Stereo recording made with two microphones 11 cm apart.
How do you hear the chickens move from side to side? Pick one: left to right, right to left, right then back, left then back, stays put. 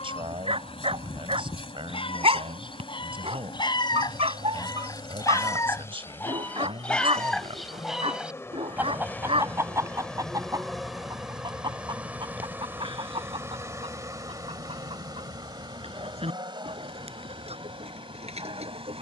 left to right.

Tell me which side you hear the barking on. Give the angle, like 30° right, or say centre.
60° right.